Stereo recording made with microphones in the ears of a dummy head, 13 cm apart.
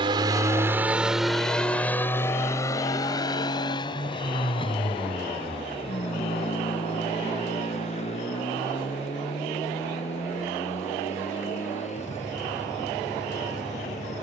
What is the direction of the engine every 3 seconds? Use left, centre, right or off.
centre, left, left, left, left.